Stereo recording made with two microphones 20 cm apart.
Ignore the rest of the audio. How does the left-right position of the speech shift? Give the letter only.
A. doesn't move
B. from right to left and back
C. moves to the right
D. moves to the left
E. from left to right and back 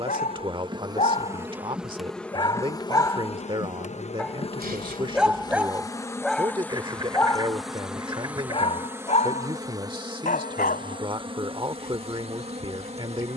A.